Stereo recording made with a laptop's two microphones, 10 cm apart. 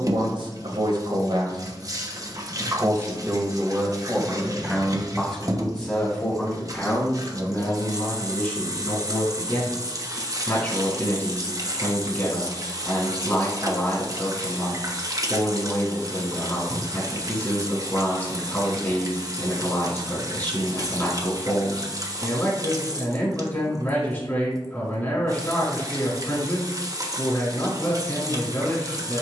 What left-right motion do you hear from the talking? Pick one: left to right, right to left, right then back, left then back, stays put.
right to left.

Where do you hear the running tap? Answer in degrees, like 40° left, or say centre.
40° right.